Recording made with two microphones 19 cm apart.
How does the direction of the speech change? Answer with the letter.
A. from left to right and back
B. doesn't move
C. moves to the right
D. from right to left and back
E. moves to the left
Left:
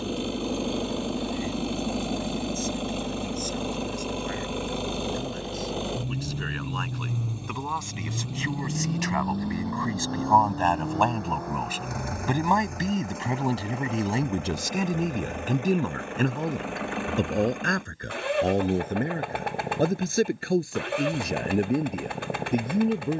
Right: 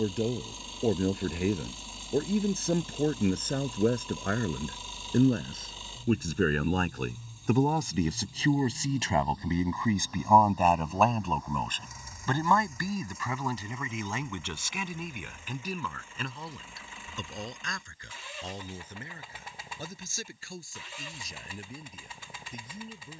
E.